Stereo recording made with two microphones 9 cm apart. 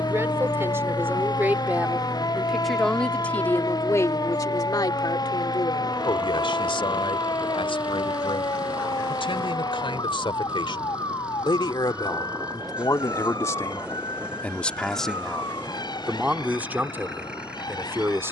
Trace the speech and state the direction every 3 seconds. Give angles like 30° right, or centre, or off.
20° right, 40° left, 80° left, 70° left, 30° left, 10° right.